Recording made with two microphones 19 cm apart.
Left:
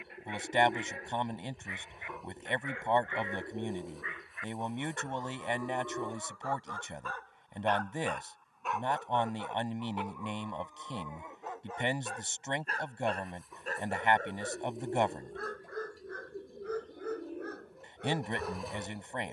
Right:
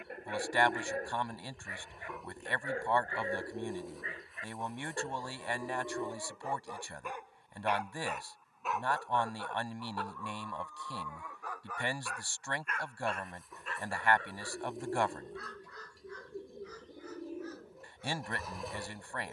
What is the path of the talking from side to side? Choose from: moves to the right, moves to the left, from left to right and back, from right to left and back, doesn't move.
doesn't move.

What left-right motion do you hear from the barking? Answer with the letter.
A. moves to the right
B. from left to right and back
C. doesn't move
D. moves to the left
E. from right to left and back
D.